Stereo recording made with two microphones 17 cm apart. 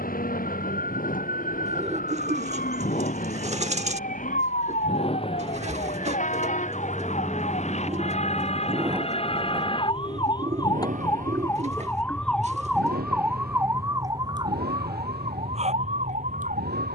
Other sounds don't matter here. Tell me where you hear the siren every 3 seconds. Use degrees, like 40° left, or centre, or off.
60° left, 60° left, 50° left, 30° left, 10° right, 40° right.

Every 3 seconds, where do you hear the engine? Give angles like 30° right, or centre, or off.
60° left, 40° left, centre, 40° right, 70° right, 80° right.